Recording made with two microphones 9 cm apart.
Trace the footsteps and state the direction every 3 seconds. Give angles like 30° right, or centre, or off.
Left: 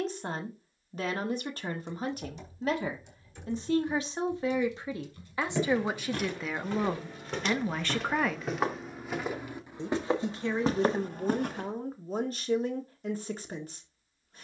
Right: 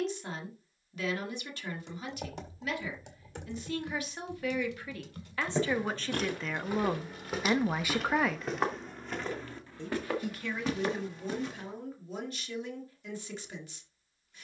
off, 20° right, 10° right, 30° left, off.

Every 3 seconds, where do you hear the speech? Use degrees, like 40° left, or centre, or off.
40° left, 30° left, centre, 30° left, 40° left.